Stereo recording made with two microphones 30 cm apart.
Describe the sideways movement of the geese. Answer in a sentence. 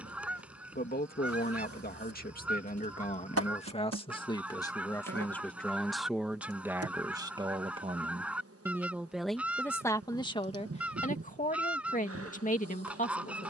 You can hear the geese stay put.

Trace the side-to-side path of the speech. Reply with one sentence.
You can hear the speech go right and come back.